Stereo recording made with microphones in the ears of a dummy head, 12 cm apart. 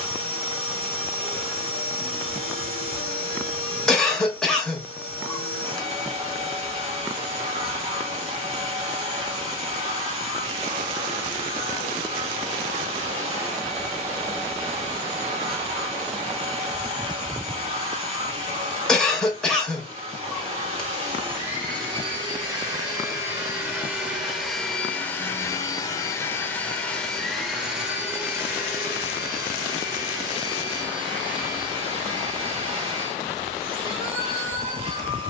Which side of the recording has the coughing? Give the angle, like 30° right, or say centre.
centre.